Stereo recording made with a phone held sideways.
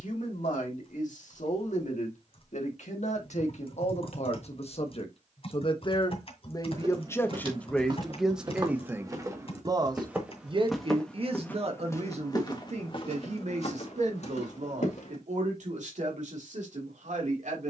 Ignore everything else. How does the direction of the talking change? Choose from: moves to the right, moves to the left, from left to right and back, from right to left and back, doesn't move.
moves to the right.